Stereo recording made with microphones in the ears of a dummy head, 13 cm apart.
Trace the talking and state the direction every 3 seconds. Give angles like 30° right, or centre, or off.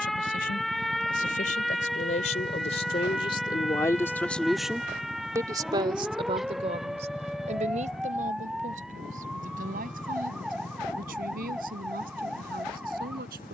60° left, 10° left, 50° right, 70° right, 70° right.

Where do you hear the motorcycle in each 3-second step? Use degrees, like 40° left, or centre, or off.
50° right, 10° right, 20° left, 40° left, 50° left.